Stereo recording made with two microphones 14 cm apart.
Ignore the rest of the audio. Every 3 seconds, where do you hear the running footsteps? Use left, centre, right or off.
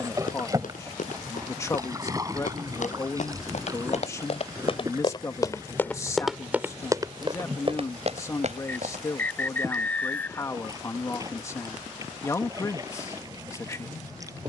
left, left, right, off, off.